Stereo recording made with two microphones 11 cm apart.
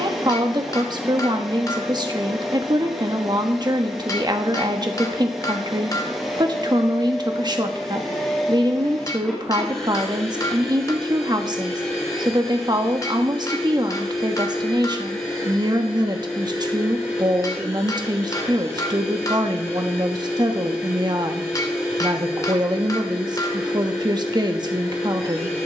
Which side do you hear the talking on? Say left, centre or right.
right.